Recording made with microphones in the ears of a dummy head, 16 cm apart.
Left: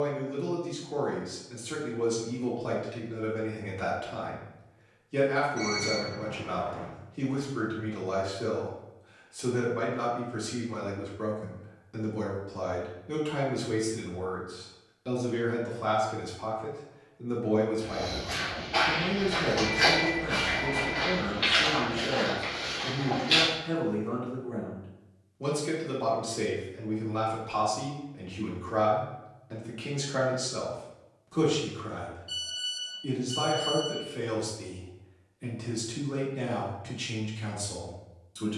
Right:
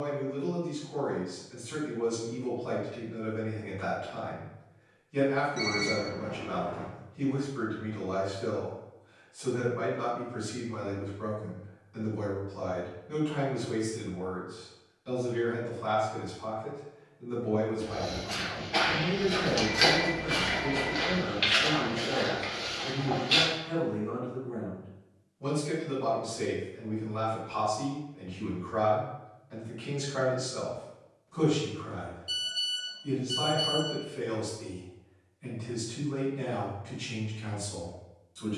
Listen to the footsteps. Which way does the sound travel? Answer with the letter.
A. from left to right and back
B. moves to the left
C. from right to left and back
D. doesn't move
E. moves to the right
A.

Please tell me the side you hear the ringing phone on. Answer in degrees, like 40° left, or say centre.
70° right.